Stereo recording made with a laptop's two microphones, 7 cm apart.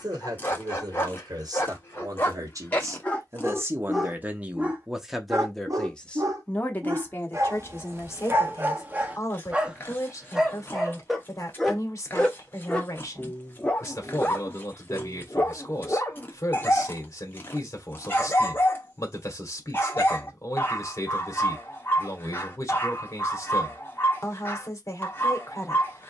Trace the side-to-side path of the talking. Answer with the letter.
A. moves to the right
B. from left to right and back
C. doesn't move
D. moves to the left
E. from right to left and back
D.